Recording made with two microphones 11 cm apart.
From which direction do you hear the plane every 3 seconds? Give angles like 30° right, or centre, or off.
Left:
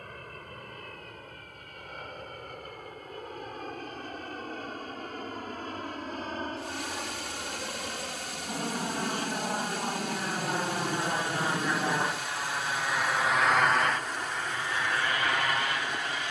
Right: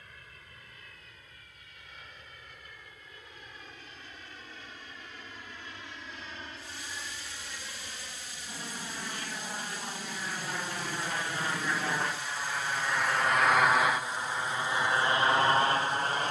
60° left, 50° left, 50° left, 30° left, centre, 30° right.